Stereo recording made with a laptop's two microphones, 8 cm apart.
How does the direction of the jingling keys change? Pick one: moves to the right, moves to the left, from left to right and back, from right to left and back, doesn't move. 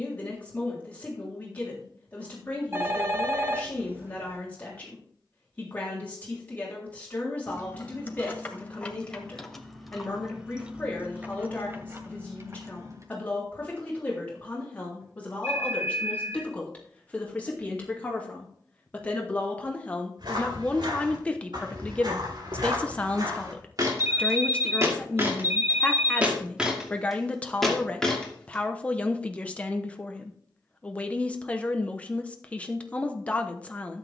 moves to the right.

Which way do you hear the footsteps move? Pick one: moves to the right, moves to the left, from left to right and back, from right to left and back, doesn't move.
moves to the left.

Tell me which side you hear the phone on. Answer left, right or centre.
right.